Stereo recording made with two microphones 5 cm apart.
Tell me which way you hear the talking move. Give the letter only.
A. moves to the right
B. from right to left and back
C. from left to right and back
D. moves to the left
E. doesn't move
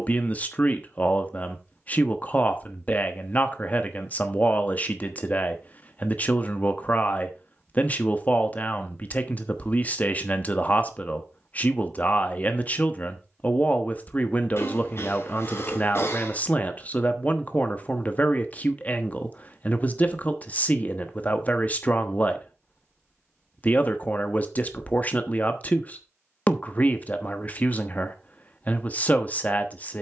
E.